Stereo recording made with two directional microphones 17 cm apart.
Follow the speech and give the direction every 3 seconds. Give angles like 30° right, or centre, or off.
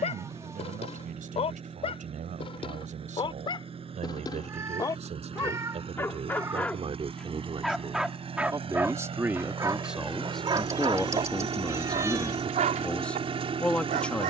50° right, 40° right, 30° right, centre, 10° left.